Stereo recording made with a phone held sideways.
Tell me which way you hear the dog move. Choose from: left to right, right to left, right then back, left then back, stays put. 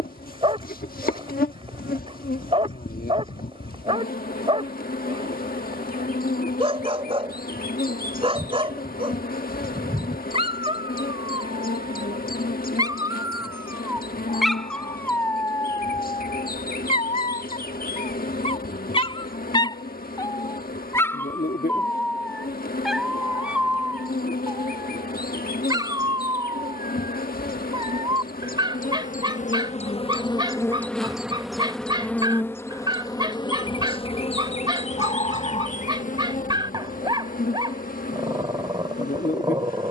left then back.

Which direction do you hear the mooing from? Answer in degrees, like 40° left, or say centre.
40° left.